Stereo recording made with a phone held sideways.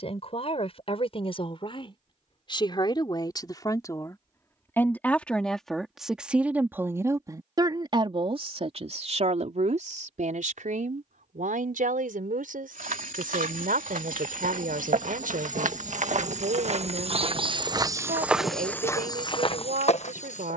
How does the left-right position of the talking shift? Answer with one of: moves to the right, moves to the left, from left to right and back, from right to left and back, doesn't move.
moves to the right.